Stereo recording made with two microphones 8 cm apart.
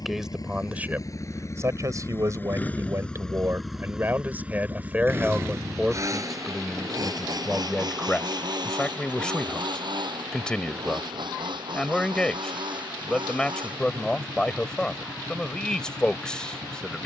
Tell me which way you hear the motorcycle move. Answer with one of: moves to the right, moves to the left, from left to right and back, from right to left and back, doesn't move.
moves to the right.